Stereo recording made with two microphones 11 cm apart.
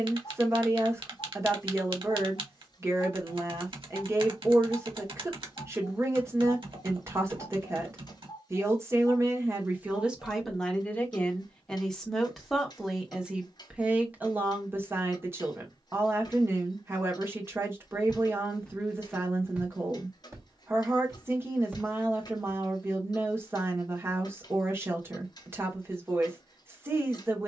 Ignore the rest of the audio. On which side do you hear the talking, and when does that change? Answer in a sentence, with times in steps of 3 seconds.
You can hear the talking on the right from 0 s, in the centre from 9 s and on the right from 15 s.